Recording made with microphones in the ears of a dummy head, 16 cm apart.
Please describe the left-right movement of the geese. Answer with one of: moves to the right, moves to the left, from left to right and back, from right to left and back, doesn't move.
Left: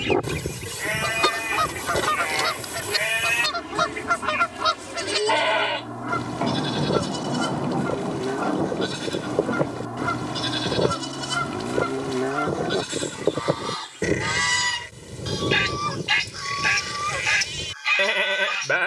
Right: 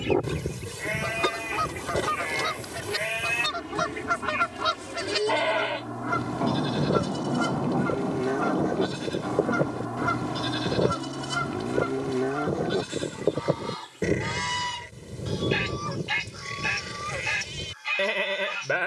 from left to right and back.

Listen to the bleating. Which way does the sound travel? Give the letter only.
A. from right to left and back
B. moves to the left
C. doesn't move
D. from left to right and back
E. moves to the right
C.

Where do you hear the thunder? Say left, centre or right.
left.